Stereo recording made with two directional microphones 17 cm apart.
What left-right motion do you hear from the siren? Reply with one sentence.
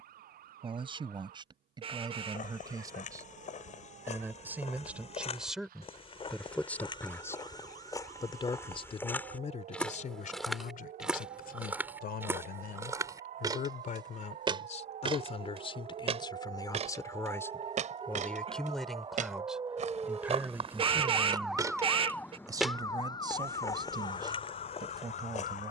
You can hear the siren move from right to left.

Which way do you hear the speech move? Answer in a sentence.
In this clip you hear the speech go left and come back.